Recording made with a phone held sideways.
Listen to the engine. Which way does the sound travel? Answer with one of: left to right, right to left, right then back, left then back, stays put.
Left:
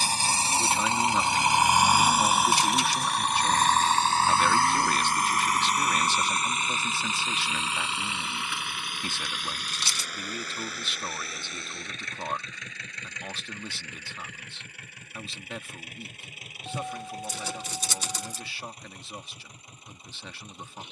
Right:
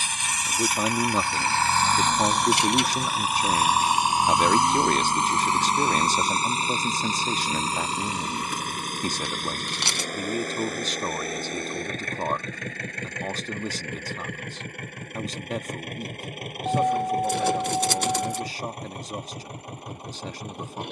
left to right.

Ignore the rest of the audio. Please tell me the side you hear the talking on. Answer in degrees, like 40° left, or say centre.
40° right.